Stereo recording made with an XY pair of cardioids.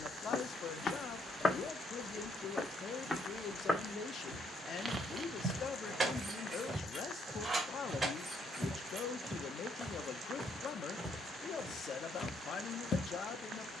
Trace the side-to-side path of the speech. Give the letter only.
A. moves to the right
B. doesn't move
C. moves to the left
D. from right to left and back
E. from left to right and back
B.